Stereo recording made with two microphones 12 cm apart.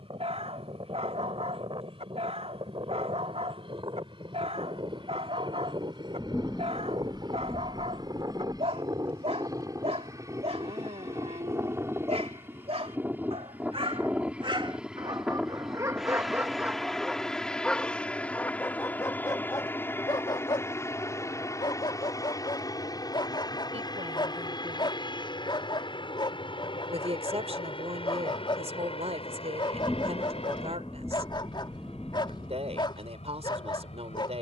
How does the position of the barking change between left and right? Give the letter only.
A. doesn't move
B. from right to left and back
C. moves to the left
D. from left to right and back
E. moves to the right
C.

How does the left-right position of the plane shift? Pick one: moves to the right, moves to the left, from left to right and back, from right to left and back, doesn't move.
moves to the left.